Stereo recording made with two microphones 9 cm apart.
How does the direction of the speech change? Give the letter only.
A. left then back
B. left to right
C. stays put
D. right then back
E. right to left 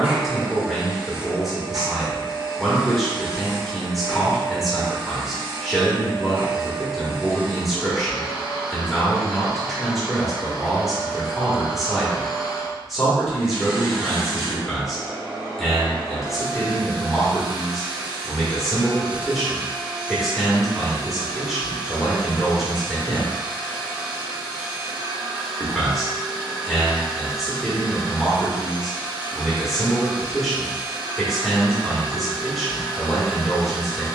C.